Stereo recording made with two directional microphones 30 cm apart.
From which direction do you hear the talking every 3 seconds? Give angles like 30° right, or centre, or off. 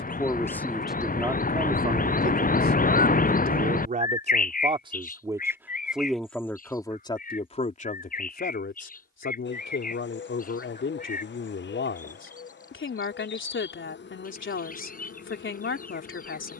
10° right, 20° right, 20° left, 40° left, 40° left, 40° left.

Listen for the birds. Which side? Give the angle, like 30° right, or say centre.
30° left.